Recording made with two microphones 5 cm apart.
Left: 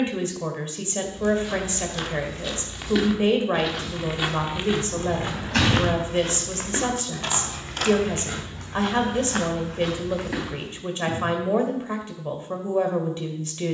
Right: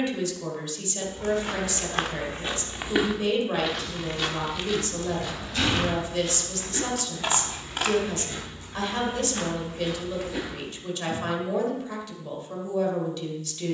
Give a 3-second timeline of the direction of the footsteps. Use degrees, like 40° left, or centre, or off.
40° right, 20° left, 60° left, 70° left, off.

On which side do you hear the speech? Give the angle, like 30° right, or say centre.
30° left.